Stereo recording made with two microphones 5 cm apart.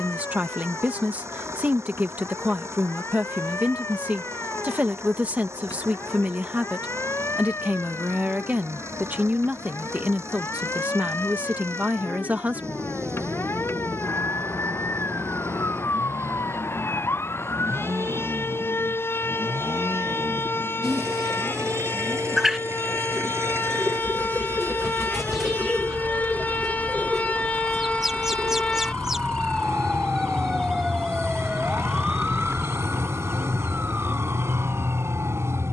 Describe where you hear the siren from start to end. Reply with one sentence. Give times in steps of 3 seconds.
In this clip you hear the siren on the left from 0 s, in the centre from 30 s and on the right from 33 s.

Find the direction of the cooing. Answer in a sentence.
You can hear the cooing in the centre.